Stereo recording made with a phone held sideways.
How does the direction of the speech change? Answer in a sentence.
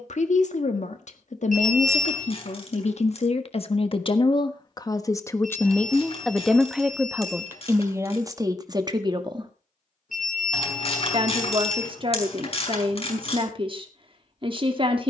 In this clip you hear the speech move to the right.